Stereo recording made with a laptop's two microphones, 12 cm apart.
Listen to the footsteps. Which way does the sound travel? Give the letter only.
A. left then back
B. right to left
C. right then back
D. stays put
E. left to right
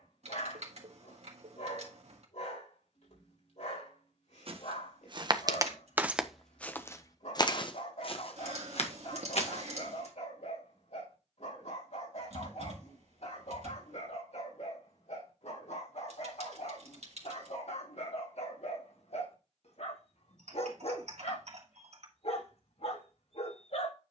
B.